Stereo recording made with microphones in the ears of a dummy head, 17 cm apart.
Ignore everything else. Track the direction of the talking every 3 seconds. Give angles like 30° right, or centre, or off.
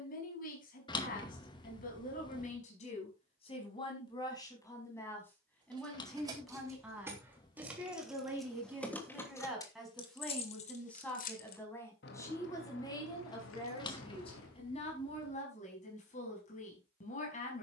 40° left, 20° left, 10° right, centre, 20° left, 40° left.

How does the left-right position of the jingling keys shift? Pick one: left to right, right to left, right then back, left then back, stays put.
right to left.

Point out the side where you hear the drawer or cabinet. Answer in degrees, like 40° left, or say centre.
20° left.